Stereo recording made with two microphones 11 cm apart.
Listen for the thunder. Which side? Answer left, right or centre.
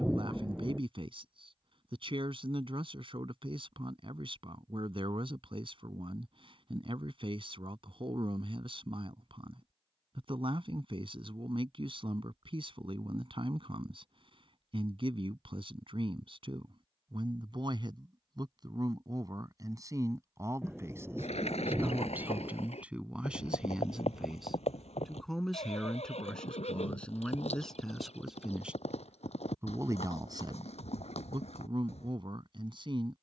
centre.